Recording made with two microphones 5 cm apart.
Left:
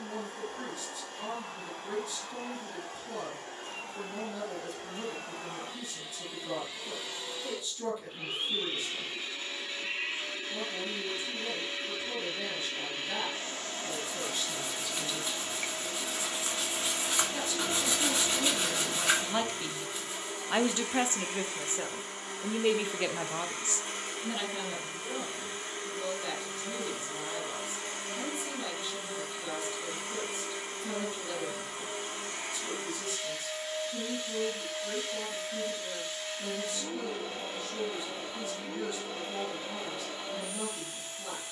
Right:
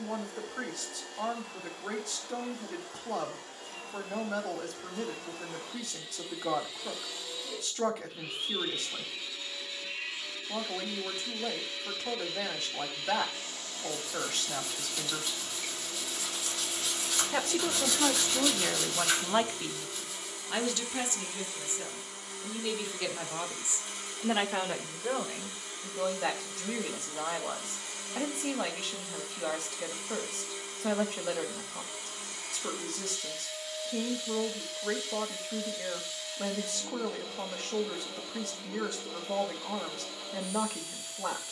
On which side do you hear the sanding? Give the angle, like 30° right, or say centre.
30° left.